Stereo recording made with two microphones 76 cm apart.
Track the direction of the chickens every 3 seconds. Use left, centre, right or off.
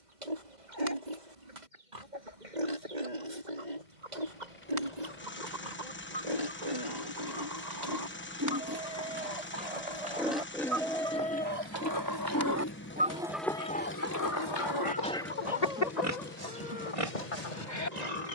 right, right, right, right, centre, left.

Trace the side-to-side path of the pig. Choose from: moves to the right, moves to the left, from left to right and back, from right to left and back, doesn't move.
from right to left and back.